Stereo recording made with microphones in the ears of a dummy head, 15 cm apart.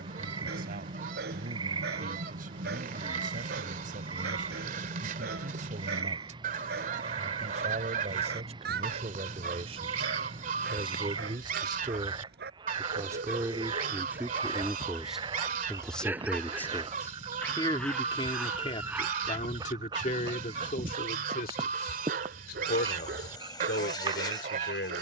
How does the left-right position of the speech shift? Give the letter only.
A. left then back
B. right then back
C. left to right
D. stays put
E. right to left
E.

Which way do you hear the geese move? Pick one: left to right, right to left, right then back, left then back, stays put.
stays put.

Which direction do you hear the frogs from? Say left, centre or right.
right.